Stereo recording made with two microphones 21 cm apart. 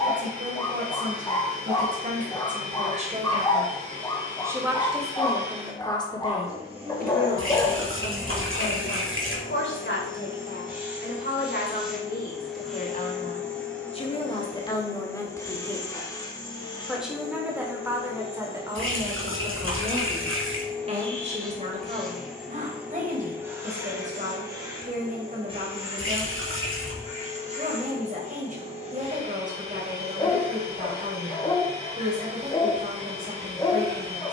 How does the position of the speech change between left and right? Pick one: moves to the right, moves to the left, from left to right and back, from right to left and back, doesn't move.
from right to left and back.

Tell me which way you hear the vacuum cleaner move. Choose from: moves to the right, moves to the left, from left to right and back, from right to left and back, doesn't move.
from right to left and back.